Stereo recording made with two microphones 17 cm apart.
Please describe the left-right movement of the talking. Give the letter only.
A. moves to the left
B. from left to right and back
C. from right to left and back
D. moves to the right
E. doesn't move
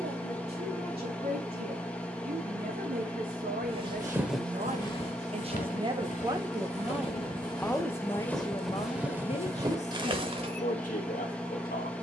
A.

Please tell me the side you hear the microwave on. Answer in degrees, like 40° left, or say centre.
10° left.